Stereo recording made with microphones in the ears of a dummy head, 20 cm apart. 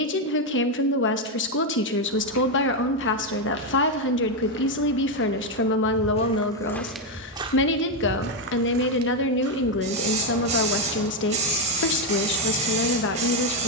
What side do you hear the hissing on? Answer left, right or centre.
right.